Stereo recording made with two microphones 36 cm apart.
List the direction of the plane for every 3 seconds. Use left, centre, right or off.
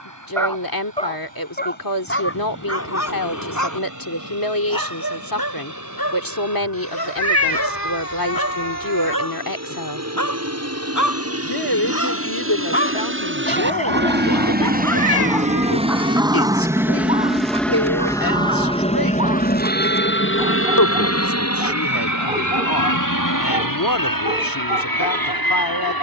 right, right, right, right, right, centre, left, left, left.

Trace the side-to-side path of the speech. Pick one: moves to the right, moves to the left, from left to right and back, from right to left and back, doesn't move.
doesn't move.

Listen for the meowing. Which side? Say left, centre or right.
left.